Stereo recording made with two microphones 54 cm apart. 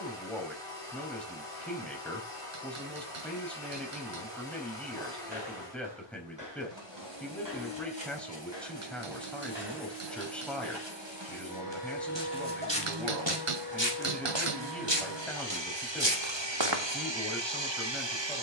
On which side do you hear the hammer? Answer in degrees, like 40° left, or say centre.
70° right.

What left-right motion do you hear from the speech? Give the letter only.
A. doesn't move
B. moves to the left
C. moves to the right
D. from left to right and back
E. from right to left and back
A.